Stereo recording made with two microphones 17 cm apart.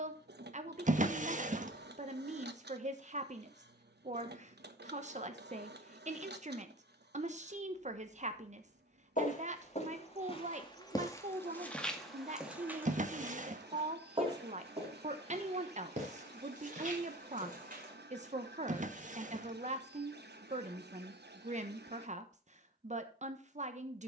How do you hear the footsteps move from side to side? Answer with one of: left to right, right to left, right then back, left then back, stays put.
left to right.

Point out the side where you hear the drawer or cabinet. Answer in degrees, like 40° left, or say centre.
50° right.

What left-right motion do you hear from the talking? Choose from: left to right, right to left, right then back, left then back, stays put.
stays put.